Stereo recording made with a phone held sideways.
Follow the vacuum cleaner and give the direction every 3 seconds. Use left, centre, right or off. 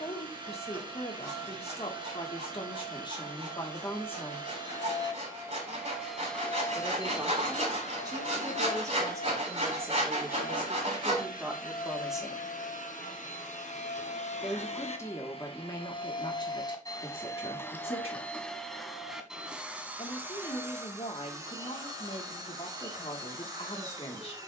right, right, left, left, left, left, centre, right.